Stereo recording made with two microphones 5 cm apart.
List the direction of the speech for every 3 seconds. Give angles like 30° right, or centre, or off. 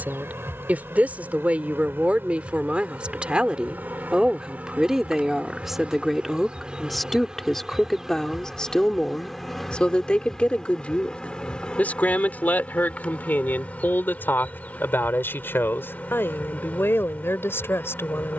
30° right, 10° right, 10° left, 30° left, 40° left, 50° left.